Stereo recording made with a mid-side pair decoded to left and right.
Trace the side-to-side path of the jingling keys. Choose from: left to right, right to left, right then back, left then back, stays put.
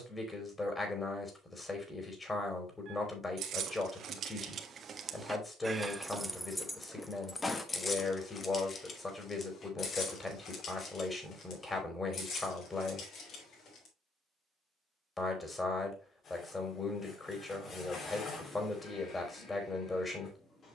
right to left.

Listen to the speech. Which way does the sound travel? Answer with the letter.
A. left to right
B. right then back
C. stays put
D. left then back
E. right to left
C.